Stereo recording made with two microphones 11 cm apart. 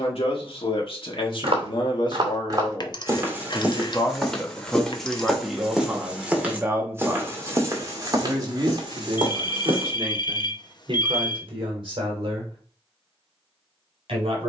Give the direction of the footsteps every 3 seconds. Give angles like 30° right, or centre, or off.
50° right, 10° right, 30° right, 50° right, off.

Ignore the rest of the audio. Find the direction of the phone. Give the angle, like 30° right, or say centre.
40° left.